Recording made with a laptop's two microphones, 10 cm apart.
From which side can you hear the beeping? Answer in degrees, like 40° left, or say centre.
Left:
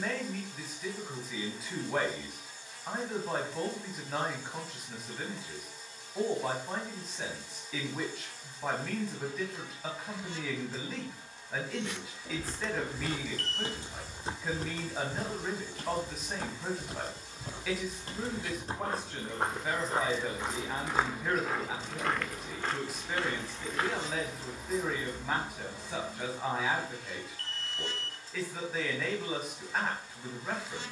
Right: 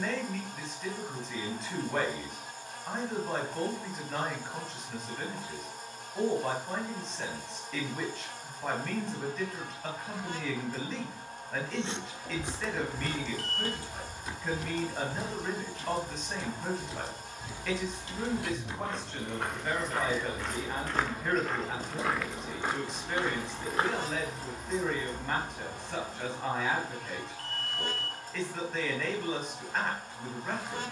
centre.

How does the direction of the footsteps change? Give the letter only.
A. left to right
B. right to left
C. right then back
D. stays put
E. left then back
E.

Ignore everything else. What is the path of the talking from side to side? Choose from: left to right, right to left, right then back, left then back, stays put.
stays put.